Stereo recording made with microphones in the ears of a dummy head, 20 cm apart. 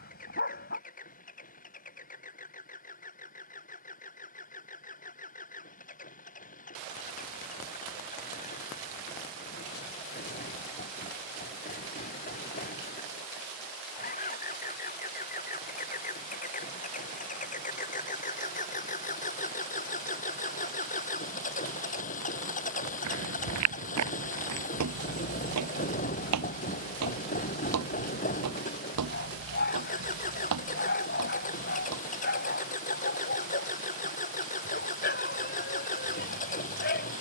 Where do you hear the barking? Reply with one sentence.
In this clip you hear the barking on the left.